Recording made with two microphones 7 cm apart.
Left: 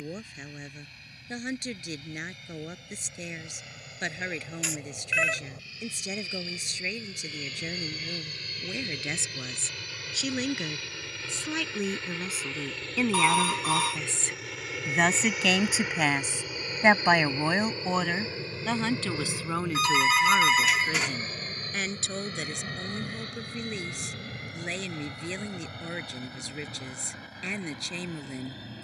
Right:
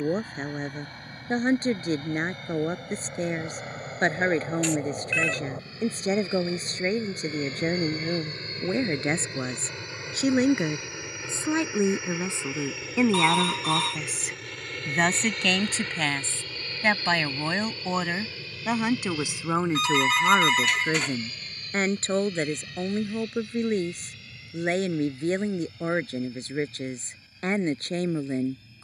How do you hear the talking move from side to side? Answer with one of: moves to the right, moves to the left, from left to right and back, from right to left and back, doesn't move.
from right to left and back.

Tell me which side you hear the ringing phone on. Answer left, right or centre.
centre.